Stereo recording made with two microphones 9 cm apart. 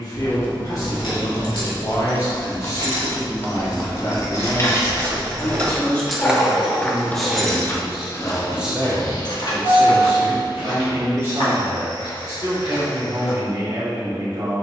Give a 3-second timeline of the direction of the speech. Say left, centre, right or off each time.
left, left, centre, right, right.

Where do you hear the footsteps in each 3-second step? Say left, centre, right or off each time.
off, right, left, left, left.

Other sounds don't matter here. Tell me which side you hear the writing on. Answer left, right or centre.
left.